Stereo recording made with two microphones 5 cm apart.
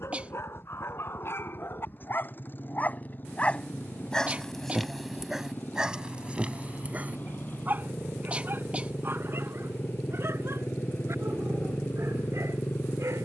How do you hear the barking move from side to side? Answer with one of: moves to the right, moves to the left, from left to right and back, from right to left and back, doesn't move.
moves to the right.